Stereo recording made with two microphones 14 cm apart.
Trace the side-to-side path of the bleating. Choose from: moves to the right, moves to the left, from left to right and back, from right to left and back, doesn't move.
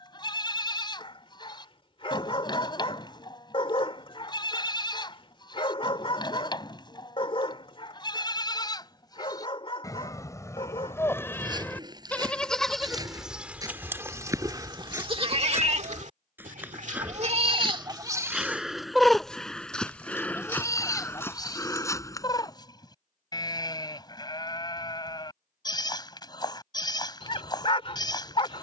from left to right and back.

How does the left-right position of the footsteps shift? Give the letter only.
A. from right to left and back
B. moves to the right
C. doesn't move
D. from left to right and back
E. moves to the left
E.